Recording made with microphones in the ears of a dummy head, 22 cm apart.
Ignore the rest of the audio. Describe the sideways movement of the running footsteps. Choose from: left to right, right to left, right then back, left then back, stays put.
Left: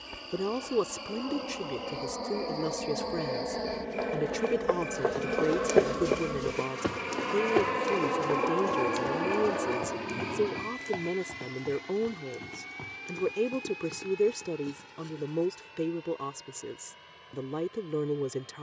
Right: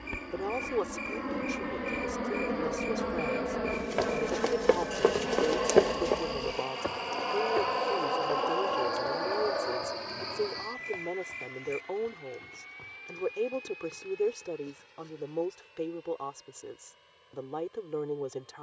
right to left.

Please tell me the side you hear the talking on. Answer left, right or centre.
left.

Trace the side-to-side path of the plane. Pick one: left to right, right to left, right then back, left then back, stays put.
right to left.